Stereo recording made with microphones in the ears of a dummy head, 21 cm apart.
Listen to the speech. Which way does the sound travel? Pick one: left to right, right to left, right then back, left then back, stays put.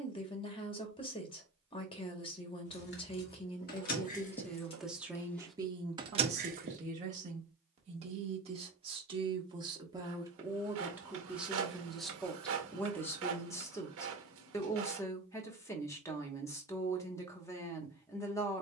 right then back.